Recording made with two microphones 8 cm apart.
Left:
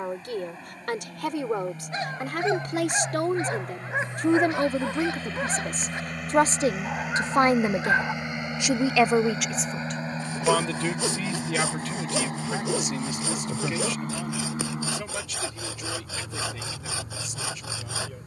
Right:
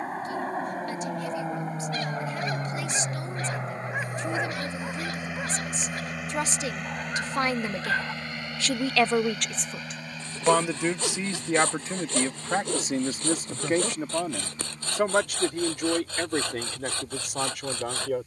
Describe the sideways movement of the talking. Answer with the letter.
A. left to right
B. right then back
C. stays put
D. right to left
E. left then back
A.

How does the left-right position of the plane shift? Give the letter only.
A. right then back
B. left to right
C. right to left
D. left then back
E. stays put
C.